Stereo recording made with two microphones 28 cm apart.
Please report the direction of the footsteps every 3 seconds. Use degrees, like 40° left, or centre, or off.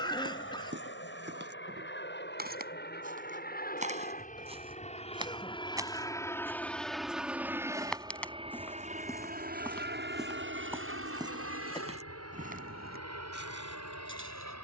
40° right, 20° right, centre, 10° right, 40° right.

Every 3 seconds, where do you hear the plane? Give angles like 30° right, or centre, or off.
50° left, 30° left, 10° right, 40° right, 60° right.